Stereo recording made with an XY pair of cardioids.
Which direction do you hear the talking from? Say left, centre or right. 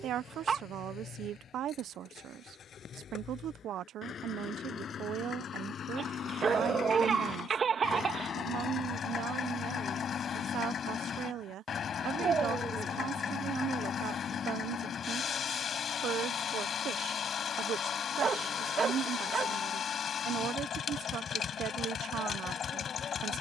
right.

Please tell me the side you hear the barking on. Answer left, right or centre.
right.